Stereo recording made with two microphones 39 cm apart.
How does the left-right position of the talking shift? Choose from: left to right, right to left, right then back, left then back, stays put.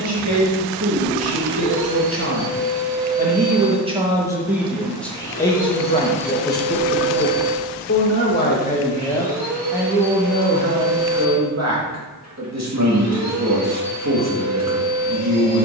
left then back.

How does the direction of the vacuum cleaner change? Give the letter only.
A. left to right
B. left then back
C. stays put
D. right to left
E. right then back
A.